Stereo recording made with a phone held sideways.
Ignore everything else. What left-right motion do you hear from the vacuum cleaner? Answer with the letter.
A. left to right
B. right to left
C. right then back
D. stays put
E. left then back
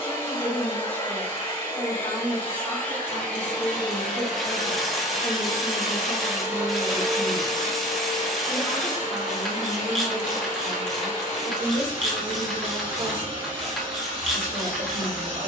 A.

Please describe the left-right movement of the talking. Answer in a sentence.
In this clip you hear the talking travel towards the right.